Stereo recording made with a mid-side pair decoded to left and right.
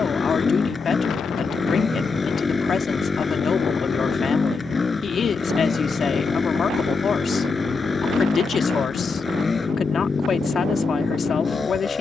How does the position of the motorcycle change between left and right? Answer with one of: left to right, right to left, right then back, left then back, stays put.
stays put.